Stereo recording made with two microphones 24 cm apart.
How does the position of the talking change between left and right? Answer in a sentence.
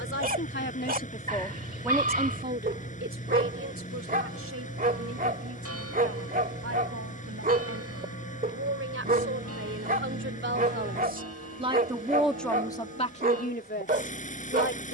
You can hear the talking go right and come back.